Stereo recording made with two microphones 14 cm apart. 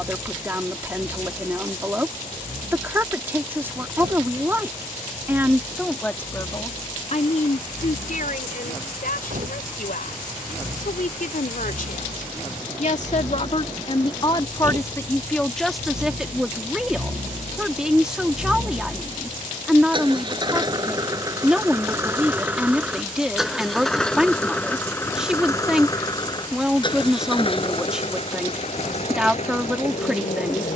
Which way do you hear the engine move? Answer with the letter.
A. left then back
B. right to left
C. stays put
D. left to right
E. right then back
B.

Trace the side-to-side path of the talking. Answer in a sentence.
In this clip you hear the talking move from right to left and back again.